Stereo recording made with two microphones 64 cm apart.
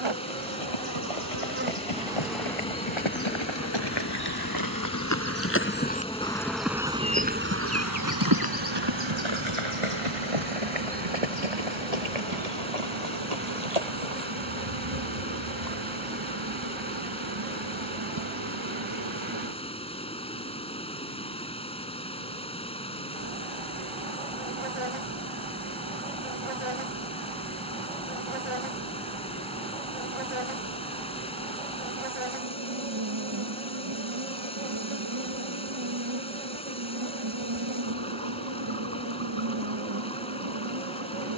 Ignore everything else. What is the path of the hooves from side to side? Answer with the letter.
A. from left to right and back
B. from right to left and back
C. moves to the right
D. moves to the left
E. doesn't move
C.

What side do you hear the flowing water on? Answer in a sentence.
In this clip you hear the flowing water in the centre.